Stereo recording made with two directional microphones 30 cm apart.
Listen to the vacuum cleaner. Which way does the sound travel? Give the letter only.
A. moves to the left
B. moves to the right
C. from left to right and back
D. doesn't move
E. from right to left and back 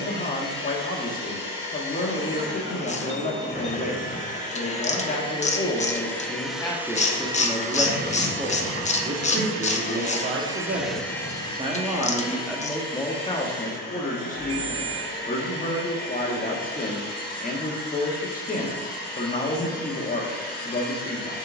C.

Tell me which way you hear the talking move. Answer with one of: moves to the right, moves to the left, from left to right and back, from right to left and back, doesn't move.
from left to right and back.